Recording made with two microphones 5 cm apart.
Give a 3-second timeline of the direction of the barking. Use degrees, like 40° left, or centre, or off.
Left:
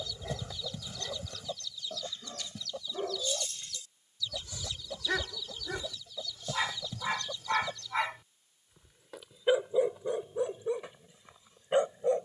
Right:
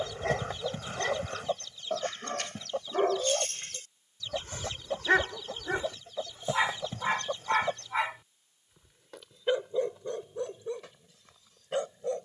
70° right, 50° right, 20° right, 10° left.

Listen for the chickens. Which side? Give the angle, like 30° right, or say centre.
50° right.